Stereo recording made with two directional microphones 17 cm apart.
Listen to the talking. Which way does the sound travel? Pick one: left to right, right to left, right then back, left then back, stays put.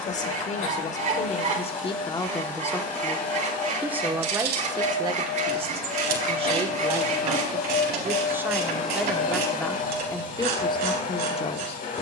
right then back.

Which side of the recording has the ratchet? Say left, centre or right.
right.